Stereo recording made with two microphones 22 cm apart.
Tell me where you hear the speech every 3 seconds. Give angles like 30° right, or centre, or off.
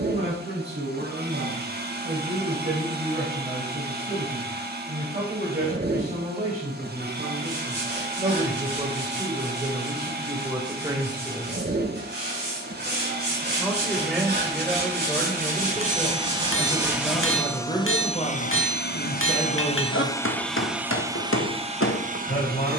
50° right, 40° right, 30° right, 20° right, centre, 20° left, 30° left, 50° left.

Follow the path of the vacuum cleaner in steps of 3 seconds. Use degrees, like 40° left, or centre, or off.
50° right, 50° right, 50° right, 50° right, 50° right, 20° right, 20° left, 30° right.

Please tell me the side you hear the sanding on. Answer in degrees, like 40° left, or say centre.
50° right.